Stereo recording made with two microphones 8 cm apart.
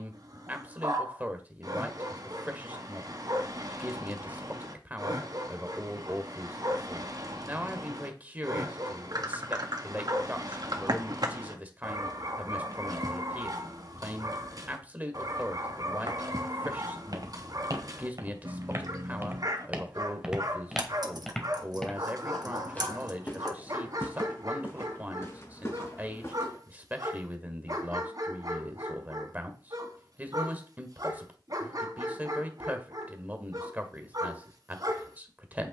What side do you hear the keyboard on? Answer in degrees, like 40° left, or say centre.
60° right.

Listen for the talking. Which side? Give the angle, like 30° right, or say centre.
20° right.